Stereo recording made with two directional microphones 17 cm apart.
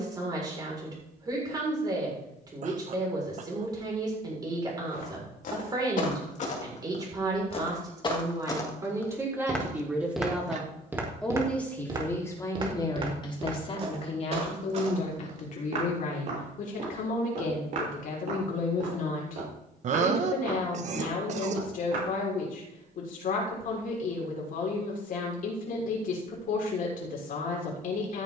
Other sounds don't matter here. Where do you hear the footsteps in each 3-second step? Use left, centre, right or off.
off, left, left, centre, right, right, right, right, off, off.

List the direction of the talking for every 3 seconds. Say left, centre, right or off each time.
right, right, right, centre, left, left, left, left, left, left.